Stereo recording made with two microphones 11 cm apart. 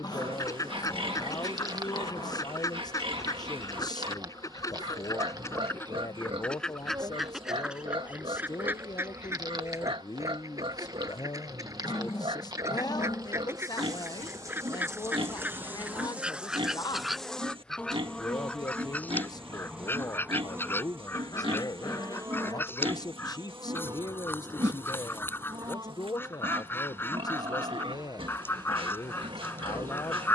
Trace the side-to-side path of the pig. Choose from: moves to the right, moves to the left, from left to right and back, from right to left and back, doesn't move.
doesn't move.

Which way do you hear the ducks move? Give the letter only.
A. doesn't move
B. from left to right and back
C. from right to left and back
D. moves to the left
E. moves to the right
B.